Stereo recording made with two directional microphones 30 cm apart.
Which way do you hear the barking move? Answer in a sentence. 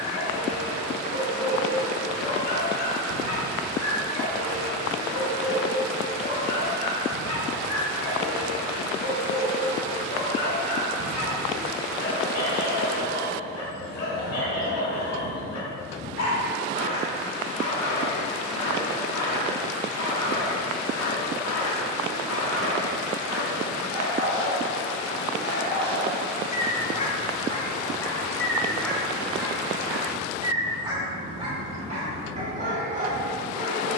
You can hear the barking go from the left side to the right.